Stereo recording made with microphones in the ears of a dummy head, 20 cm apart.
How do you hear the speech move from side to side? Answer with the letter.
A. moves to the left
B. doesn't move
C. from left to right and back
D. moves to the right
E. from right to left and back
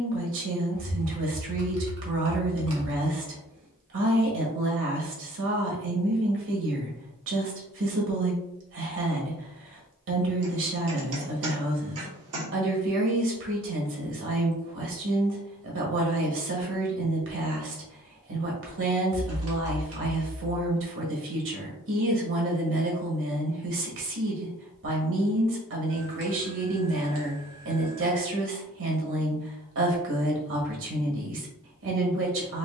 B.